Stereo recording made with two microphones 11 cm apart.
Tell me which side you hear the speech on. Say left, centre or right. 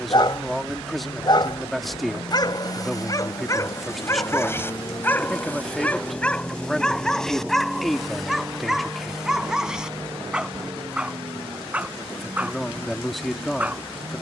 centre.